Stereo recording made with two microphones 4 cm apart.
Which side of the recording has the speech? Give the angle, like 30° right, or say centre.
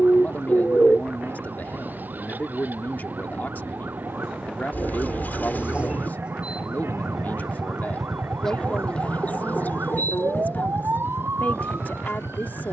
50° left.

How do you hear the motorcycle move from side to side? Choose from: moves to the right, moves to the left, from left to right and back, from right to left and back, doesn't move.
moves to the left.